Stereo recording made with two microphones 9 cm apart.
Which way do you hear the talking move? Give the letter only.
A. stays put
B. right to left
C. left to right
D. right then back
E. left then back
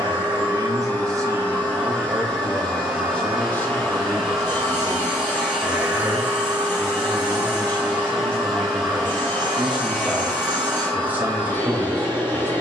E.